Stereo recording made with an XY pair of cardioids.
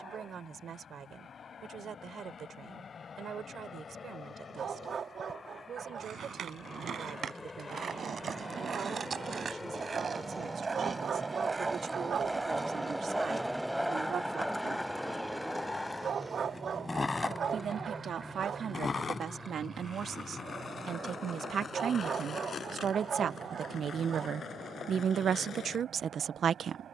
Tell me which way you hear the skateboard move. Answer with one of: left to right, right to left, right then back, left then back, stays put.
right to left.